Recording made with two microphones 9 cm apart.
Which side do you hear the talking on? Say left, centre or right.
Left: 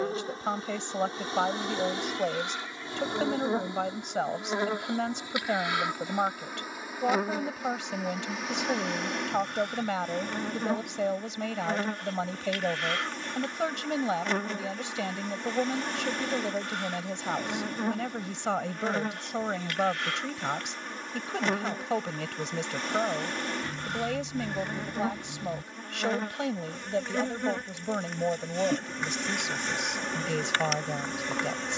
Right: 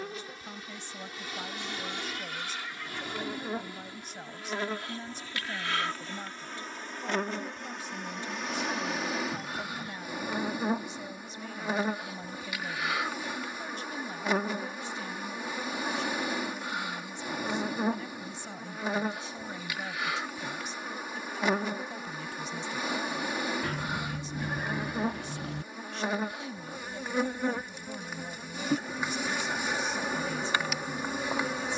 left.